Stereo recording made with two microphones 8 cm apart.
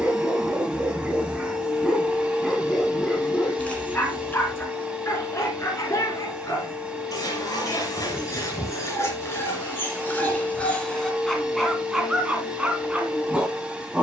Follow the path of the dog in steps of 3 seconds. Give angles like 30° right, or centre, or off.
10° right, 30° left, 40° left, 20° left, 10° right.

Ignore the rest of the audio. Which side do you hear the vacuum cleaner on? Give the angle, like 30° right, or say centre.
10° right.